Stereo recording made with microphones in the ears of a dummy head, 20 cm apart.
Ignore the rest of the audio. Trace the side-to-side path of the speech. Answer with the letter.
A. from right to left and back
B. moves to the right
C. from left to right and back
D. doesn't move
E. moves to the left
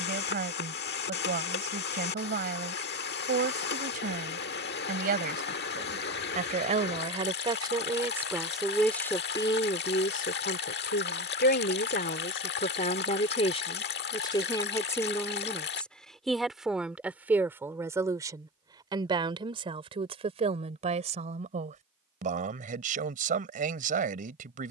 A.